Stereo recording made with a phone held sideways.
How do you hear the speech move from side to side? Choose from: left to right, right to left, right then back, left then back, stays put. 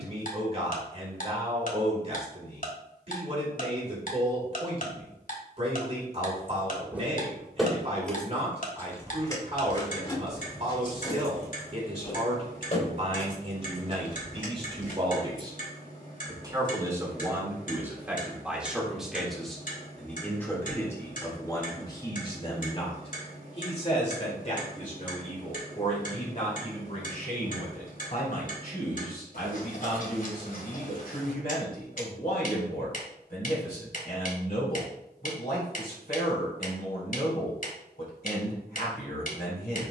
right to left.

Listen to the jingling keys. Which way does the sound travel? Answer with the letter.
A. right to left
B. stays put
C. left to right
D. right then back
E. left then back
A.